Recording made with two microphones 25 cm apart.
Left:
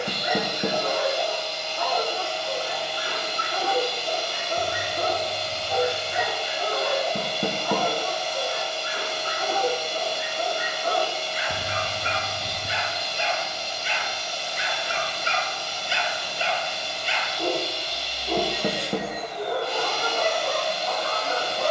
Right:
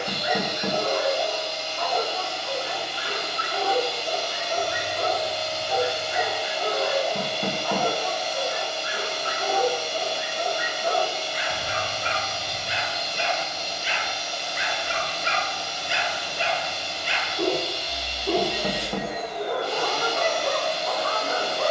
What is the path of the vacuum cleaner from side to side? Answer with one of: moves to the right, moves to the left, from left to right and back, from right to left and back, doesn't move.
doesn't move.